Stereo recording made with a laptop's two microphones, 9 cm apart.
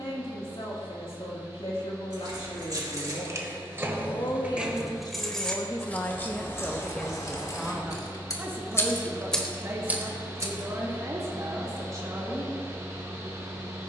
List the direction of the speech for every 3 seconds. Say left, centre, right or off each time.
left, left, centre, right, right.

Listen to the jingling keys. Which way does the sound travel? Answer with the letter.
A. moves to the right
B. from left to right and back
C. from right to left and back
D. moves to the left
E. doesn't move
C.